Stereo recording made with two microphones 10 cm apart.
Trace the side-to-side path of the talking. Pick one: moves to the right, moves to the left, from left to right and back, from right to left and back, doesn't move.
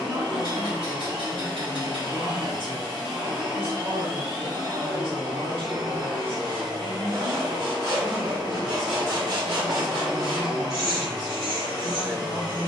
doesn't move.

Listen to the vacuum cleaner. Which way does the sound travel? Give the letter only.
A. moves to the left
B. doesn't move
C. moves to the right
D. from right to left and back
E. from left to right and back
B.